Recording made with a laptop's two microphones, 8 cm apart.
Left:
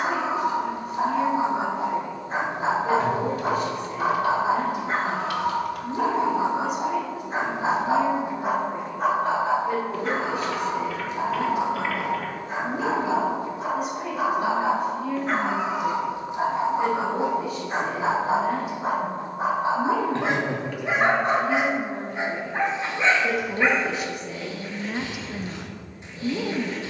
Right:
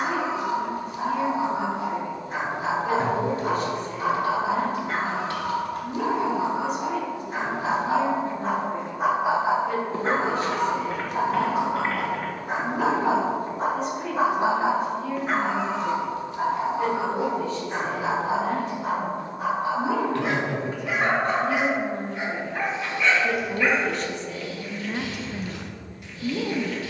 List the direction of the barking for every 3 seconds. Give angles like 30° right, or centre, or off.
30° left, 30° left, 20° left, 40° right, 40° right, 20° left, 30° left, 30° left, 30° left.